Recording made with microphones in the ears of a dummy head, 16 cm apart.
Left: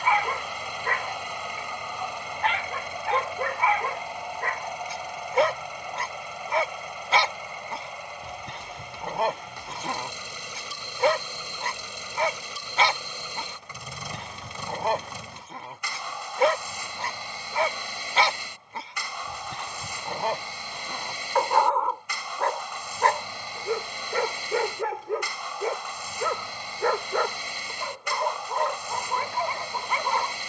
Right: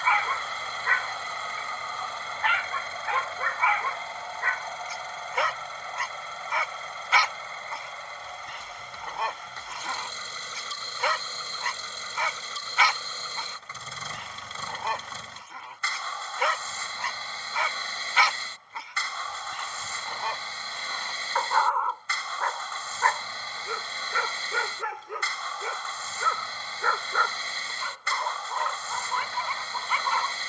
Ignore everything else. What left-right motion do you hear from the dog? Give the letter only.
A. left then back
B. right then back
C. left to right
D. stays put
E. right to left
D.